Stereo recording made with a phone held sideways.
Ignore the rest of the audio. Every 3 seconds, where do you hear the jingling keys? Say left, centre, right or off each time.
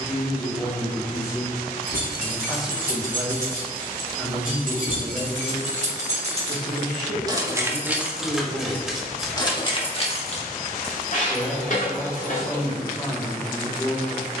right, right, right, left, left.